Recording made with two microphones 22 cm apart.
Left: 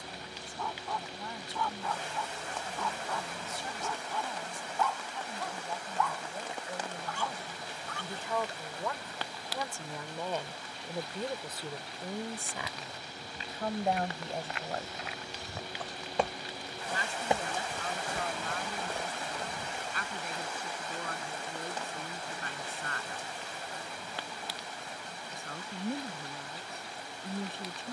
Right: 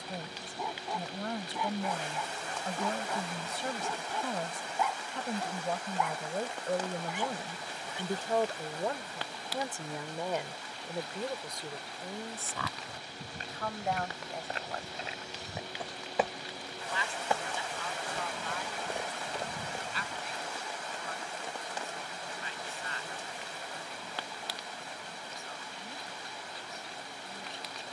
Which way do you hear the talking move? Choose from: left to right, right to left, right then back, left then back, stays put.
right to left.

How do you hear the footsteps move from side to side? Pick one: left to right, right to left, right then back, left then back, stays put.
left then back.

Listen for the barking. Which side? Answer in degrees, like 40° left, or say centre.
20° right.